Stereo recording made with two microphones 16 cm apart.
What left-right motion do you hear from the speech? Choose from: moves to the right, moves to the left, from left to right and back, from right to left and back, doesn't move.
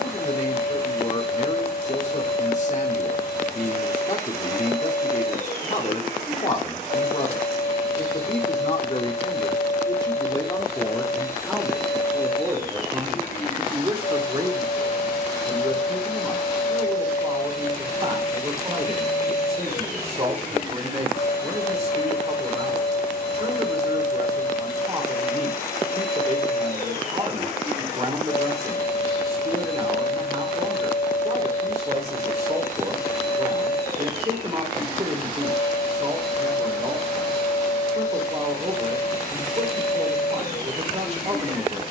moves to the right.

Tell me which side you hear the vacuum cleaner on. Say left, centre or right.
left.